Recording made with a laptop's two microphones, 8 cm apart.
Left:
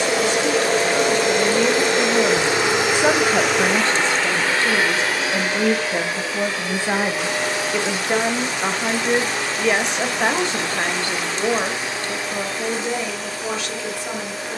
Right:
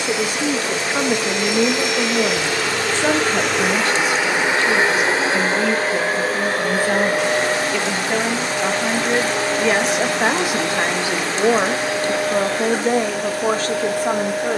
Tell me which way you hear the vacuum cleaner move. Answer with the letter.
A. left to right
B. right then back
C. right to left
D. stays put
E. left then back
A.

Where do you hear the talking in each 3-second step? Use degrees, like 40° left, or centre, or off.
20° right, 30° left, 20° left, 10° right, 40° right.